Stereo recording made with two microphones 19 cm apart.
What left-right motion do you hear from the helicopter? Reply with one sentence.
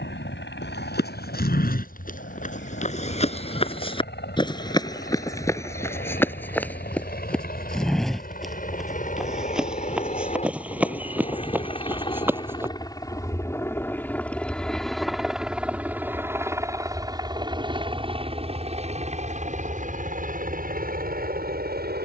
In this clip you hear the helicopter move from left to right.